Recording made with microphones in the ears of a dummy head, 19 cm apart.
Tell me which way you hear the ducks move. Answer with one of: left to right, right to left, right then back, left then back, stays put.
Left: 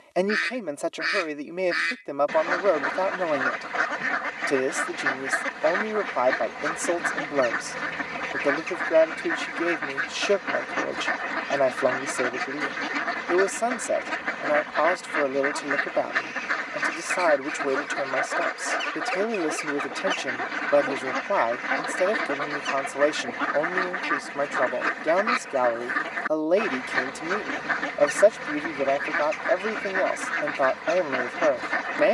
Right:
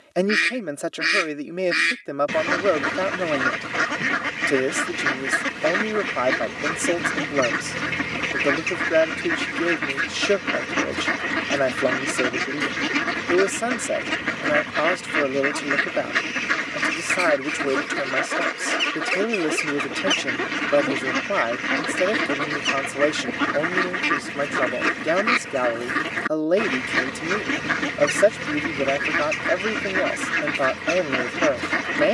stays put.